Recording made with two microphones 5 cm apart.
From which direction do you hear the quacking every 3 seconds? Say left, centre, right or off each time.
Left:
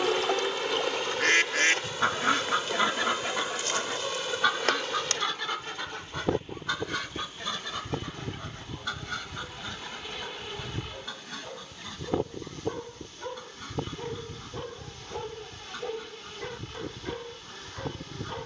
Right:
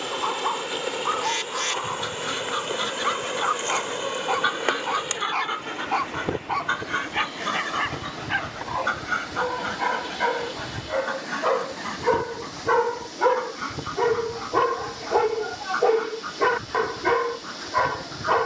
left, centre, right, right, right, right.